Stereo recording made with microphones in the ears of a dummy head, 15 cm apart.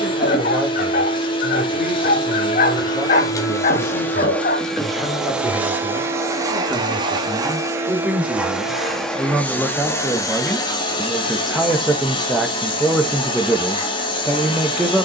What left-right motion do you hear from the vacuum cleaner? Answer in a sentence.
In this clip you hear the vacuum cleaner go right and come back.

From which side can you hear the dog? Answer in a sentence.
In this clip you hear the dog on the left.